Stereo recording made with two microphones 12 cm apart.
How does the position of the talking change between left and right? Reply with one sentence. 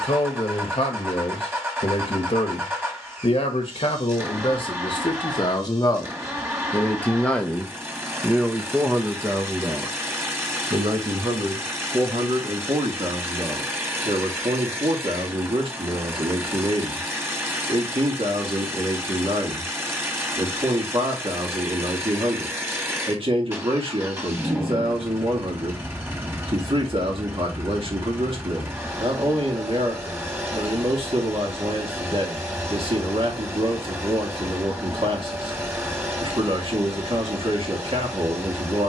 You can hear the talking move from left to right.